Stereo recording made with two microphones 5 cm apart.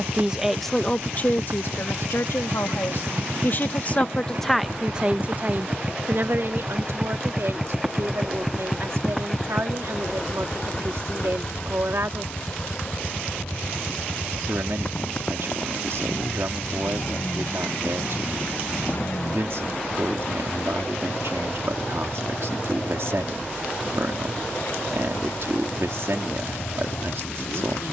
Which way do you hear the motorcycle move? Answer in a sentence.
You can hear the motorcycle go from the right side to the left.